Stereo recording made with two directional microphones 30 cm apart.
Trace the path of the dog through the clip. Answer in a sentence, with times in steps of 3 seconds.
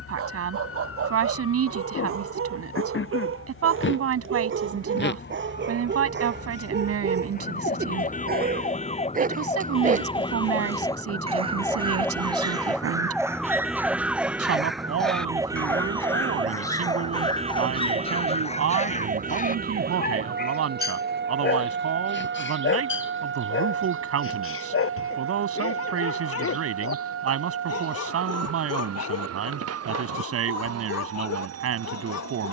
You can hear the dog on the right from 0 s, in the centre from 12 s and on the left from 18 s.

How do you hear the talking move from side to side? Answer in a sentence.
In this clip you hear the talking stay in one place.